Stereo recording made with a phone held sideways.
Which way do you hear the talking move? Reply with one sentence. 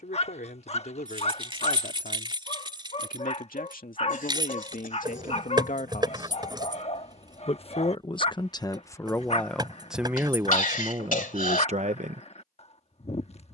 You can hear the talking move to the right.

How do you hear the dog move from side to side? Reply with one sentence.
You can hear the dog stay in one place.